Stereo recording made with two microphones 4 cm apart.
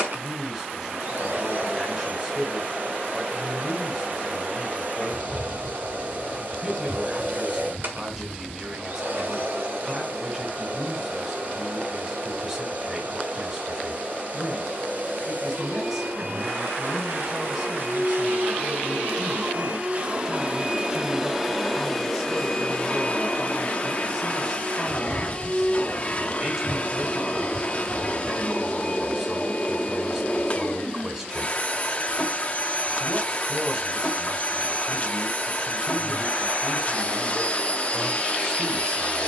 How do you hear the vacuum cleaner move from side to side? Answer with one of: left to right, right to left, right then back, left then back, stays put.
right to left.